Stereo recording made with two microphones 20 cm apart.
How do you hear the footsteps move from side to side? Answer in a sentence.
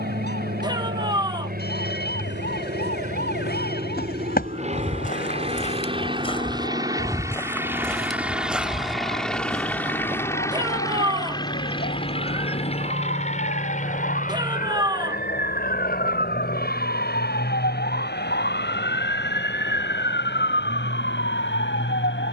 In this clip you hear the footsteps go from the left side to the right.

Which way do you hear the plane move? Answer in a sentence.
In this clip you hear the plane go from the right side to the left.